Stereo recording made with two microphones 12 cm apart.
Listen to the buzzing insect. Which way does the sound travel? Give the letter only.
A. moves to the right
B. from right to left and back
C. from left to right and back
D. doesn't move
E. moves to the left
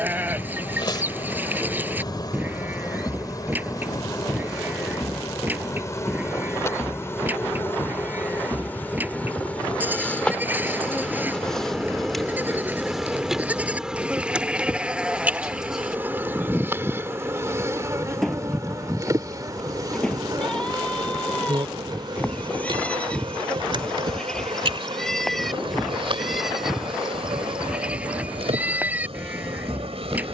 A.